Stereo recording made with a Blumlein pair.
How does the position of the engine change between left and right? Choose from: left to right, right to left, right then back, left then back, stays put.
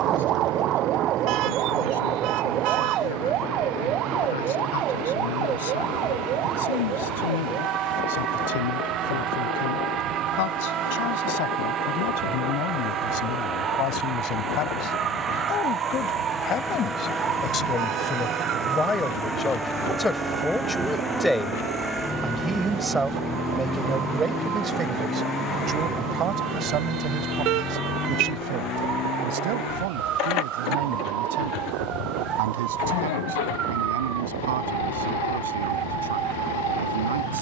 right to left.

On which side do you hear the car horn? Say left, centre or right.
right.